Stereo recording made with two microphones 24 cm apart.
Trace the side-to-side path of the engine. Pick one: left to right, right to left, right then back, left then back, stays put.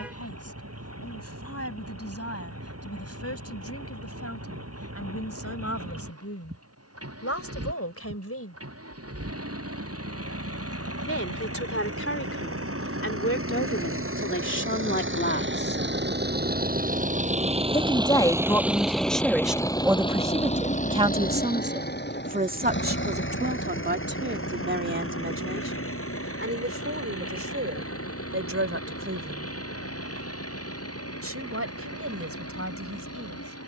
right to left.